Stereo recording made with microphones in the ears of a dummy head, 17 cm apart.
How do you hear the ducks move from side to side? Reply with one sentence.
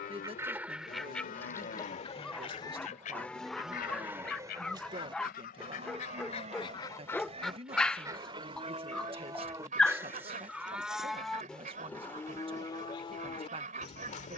In this clip you hear the ducks go left and come back.